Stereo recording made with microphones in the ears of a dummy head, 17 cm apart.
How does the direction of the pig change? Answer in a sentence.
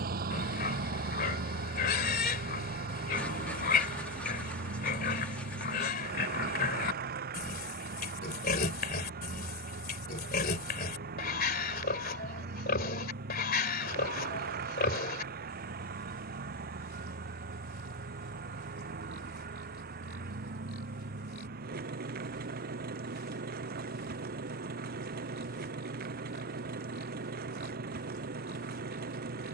You can hear the pig stay put.